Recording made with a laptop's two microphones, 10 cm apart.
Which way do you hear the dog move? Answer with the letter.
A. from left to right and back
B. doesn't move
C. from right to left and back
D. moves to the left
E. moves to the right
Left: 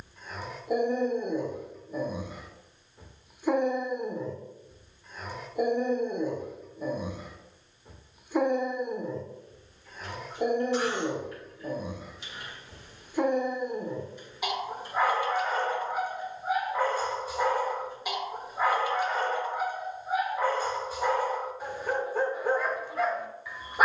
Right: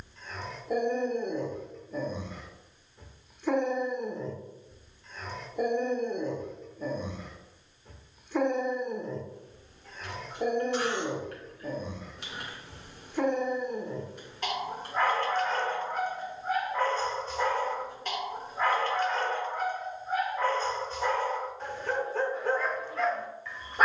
B.